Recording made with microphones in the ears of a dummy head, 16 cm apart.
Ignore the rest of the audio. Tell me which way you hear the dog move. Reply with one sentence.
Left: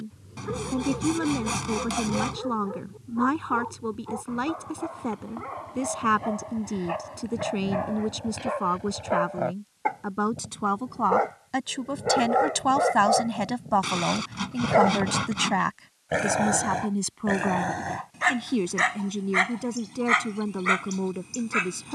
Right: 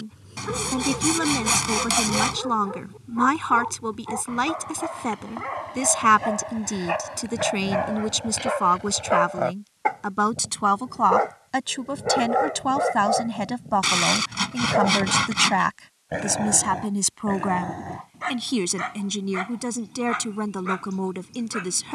In this clip you hear the dog travel towards the left.